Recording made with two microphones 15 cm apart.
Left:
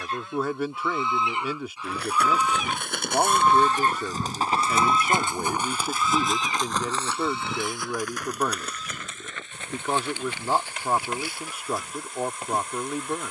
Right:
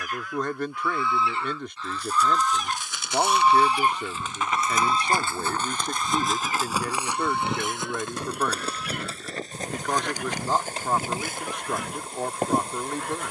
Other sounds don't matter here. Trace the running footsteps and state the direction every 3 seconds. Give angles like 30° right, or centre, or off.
60° left, 30° left, 20° right, 40° right, 50° right.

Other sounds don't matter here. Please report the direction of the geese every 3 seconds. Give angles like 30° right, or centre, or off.
20° left, 20° right, 60° right, 70° right, 70° right.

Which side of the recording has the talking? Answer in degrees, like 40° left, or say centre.
10° left.